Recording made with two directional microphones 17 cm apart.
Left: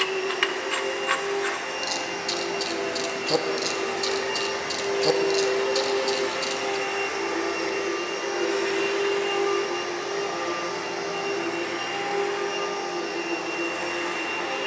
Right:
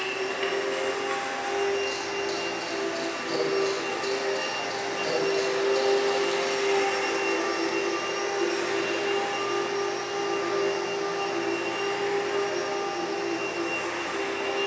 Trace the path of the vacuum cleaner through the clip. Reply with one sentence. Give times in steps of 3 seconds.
You can hear the vacuum cleaner on the left from 0 s, in the centre from 6 s and on the left from 9 s.